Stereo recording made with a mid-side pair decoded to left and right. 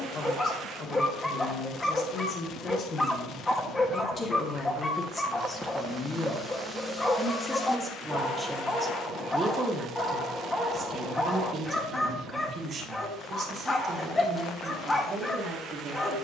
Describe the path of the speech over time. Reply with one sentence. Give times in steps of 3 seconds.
You can hear the speech on the left from 0 s, in the centre from 6 s and on the right from 9 s.